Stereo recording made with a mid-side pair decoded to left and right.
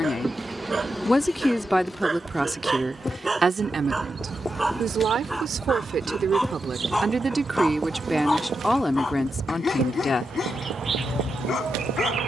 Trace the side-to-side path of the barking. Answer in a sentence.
You can hear the barking go from the right side to the left.